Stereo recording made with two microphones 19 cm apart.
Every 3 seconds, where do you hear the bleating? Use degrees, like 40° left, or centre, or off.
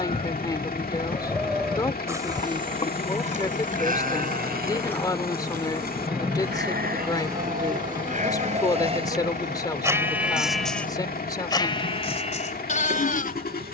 centre, 50° right, 50° right, centre, 40° left.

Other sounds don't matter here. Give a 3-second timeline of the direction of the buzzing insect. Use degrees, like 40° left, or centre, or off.
30° left, 20° left, 20° right, 50° right, 60° right.